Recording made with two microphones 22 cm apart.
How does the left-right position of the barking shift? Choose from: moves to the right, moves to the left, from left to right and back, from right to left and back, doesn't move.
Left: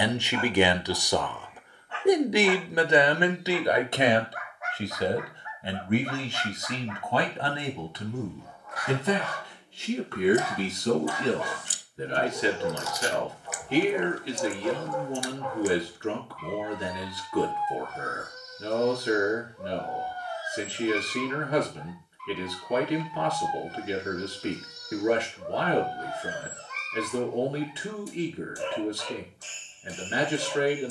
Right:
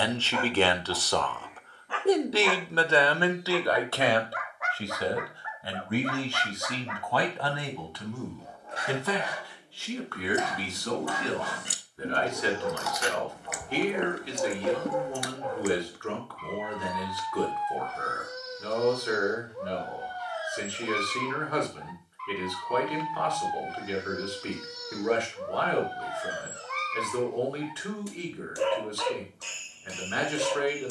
from right to left and back.